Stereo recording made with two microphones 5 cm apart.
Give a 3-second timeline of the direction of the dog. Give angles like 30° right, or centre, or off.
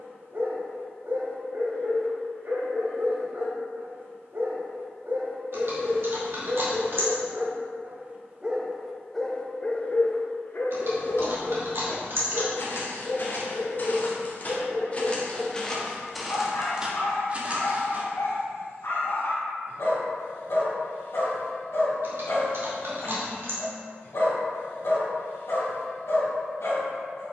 60° right, 60° right, 40° right, 50° left, 80° left, 80° left, 80° left, 80° left, 80° left.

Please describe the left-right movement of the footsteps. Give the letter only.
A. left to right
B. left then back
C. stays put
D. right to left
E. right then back
A.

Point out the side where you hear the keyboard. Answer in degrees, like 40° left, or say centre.
60° right.